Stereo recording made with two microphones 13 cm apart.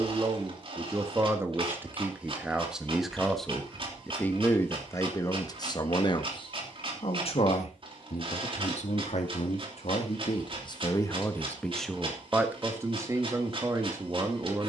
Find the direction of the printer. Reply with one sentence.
You can hear the printer on the right.